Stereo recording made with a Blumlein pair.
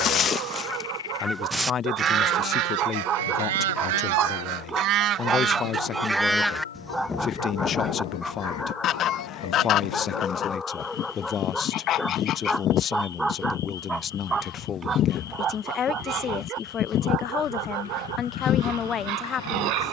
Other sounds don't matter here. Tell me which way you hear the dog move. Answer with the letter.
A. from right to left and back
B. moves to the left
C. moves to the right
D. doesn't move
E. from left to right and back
A.